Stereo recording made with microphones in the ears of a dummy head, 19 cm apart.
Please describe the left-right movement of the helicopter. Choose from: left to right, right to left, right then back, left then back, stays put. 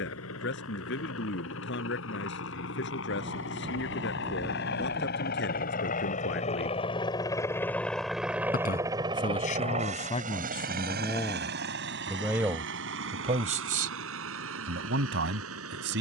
left to right.